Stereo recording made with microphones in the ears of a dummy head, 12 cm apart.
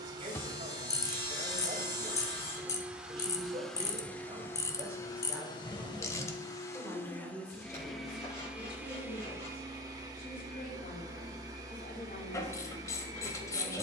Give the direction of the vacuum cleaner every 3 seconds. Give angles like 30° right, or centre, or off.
20° right, 20° left, 10° left, 20° right, 30° right.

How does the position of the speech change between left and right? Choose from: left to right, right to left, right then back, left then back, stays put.
right to left.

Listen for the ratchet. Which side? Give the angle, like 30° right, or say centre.
20° left.